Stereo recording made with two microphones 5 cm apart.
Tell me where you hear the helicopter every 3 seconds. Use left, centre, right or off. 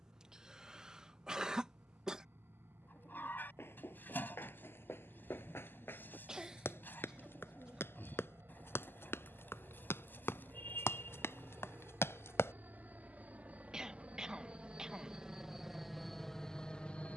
right, right, right, right, right, centre.